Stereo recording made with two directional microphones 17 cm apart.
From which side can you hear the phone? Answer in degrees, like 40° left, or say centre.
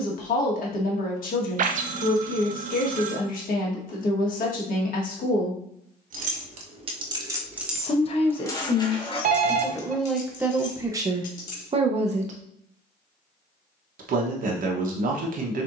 50° right.